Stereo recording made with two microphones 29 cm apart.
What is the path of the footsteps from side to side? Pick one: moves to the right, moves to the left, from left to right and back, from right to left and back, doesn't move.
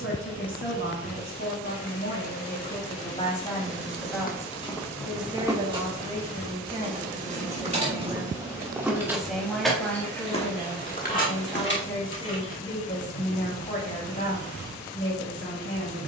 from left to right and back.